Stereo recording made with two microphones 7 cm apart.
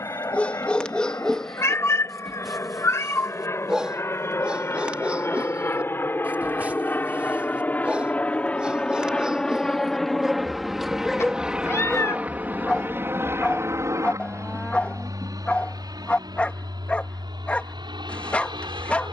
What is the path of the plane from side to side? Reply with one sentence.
In this clip you hear the plane travel towards the right.